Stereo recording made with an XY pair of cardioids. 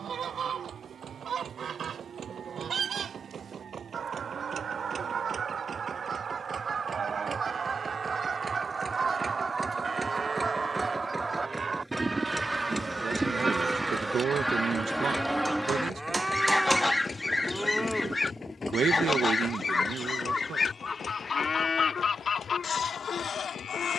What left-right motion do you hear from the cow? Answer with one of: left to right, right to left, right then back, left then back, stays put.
right to left.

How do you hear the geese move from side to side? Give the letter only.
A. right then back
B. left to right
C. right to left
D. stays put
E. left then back
C.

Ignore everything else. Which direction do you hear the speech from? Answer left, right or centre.
right.